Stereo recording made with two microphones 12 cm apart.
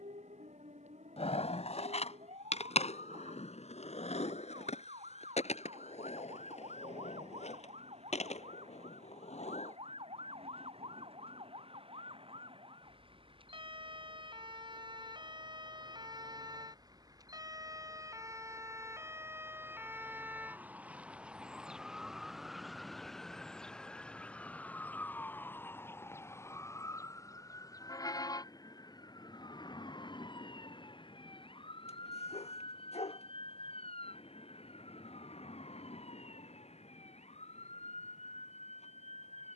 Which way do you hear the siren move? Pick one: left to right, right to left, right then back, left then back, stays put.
right to left.